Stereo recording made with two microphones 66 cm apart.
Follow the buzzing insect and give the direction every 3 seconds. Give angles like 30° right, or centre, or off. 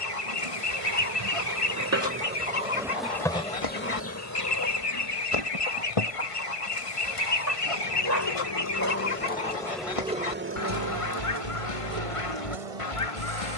30° right, 30° left, 40° left, 20° right, 60° right.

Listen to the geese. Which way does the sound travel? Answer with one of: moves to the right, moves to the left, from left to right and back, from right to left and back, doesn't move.
doesn't move.